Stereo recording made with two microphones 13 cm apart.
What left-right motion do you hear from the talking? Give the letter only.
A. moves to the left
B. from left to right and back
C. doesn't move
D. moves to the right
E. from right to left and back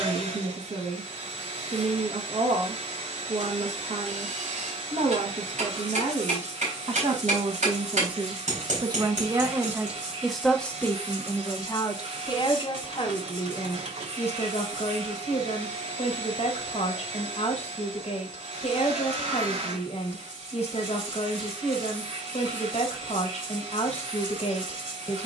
A.